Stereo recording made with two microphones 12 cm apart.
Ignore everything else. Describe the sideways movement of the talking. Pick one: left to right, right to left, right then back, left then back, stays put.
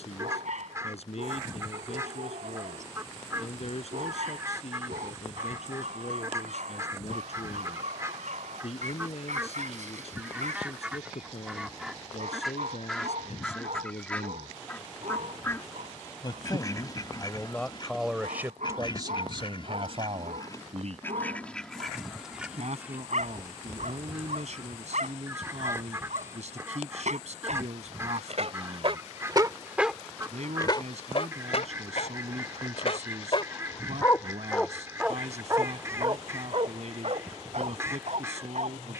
left to right.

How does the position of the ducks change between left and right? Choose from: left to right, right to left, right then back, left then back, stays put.
left then back.